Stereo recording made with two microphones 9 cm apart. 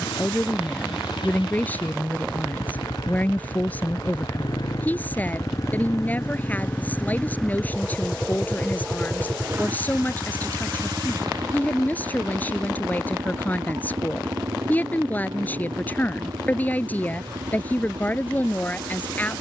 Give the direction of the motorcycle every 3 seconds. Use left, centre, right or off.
left, left, centre, right, right, right, right.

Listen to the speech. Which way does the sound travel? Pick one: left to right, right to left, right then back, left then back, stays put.
stays put.